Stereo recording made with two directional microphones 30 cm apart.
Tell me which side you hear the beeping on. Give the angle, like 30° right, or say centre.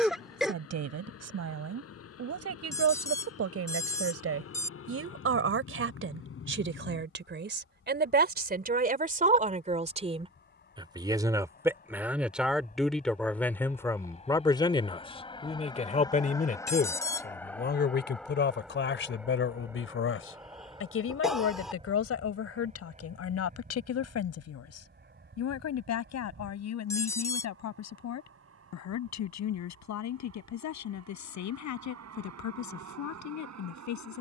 10° left.